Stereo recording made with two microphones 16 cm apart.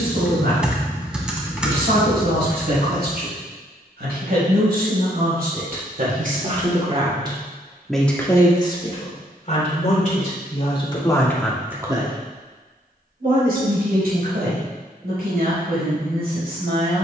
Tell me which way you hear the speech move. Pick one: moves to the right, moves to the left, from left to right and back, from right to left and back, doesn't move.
from right to left and back.